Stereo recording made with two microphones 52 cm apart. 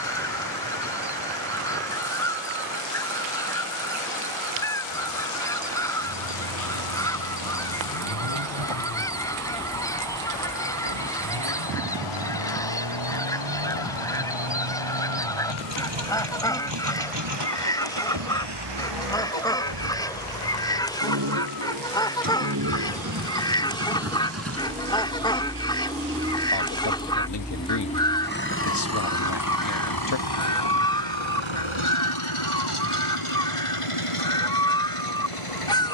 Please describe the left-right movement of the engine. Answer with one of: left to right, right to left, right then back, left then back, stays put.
right to left.